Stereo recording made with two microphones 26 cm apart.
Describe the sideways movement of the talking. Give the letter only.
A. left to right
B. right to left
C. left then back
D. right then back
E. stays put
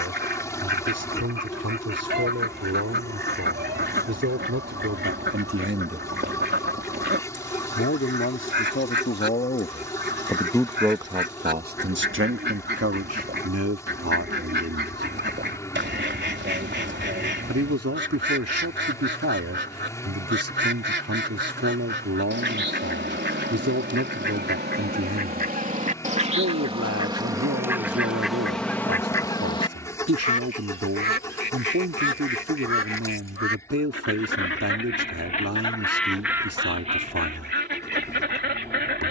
C.